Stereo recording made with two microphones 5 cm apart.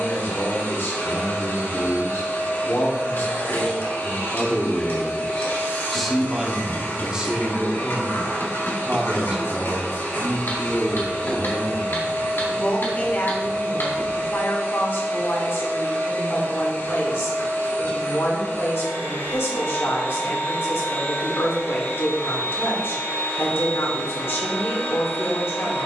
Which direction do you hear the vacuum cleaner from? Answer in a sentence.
In this clip you hear the vacuum cleaner on the left.